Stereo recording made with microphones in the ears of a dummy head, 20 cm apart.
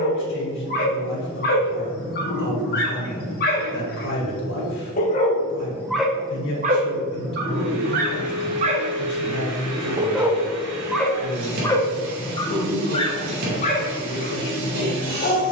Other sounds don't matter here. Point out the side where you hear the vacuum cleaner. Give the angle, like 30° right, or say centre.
80° right.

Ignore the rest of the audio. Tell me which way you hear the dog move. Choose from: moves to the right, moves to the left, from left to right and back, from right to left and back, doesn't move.
from left to right and back.